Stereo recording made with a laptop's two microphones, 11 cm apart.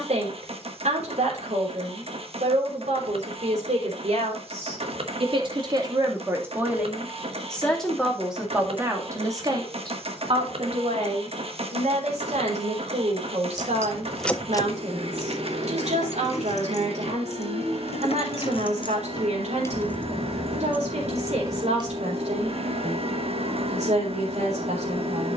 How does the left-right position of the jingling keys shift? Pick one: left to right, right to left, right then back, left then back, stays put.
left then back.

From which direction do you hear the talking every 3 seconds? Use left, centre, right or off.
right, right, centre, right, right, right, right, right, right.